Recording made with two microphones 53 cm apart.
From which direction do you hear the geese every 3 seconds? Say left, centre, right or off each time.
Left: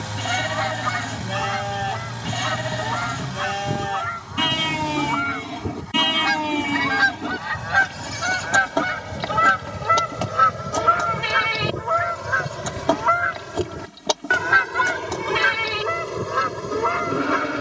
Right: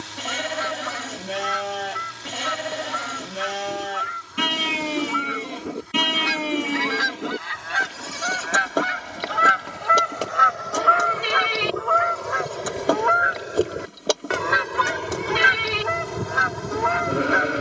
left, left, left, left, left, centre.